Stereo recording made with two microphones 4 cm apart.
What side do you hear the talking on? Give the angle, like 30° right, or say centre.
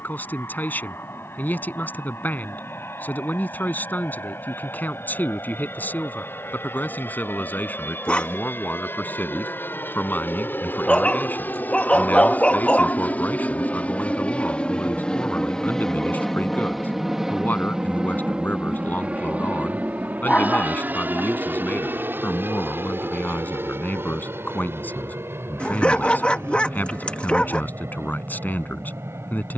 50° left.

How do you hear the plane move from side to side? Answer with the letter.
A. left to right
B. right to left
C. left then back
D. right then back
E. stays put
A.